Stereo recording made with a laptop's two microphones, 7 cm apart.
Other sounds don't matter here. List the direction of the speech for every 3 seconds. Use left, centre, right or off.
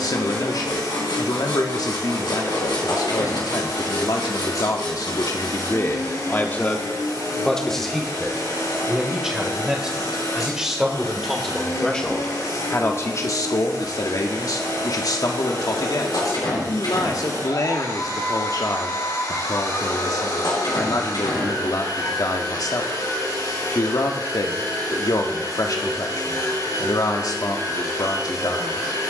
left, left, centre, centre, left, left, left, left, left, left.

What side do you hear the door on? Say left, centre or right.
left.